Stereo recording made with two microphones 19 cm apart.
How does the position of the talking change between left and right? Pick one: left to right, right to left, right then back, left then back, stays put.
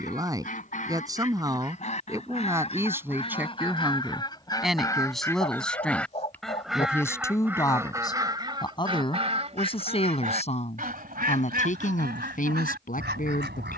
right to left.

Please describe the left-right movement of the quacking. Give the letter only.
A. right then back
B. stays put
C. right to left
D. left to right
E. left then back
D.